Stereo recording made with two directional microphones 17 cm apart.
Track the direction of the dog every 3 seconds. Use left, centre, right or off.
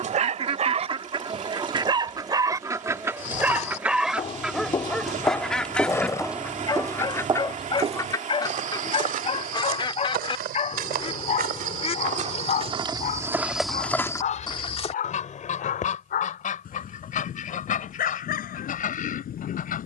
right, centre, left, left, left, left, left.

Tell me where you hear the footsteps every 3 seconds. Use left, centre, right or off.
off, left, right, right, centre, off, off.